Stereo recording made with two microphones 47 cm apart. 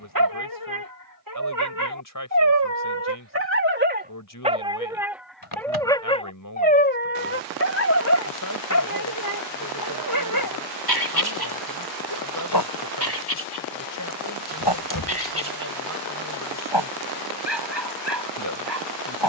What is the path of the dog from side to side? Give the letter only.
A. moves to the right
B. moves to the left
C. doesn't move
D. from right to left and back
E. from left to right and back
B.